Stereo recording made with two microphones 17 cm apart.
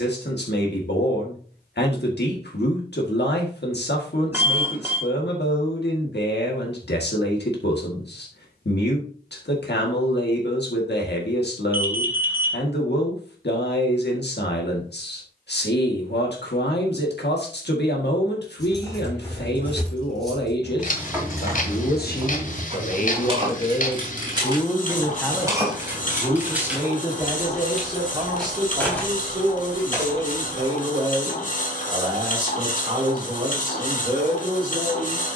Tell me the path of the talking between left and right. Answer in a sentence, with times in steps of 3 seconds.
In this clip you hear the talking on the left from 0 s, in the centre from 24 s and on the right from 27 s.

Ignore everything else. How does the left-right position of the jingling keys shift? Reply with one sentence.
In this clip you hear the jingling keys go right and come back.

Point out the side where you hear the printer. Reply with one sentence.
In this clip you hear the printer on the left.